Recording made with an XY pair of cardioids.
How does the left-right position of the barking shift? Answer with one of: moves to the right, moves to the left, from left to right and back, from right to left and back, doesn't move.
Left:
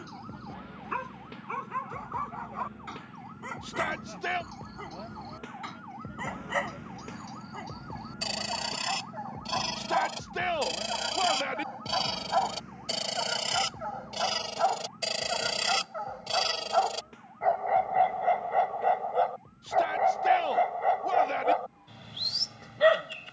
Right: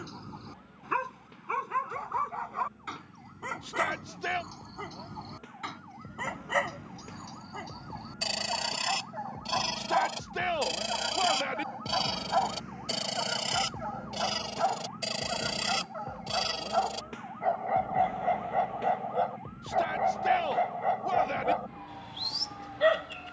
moves to the left.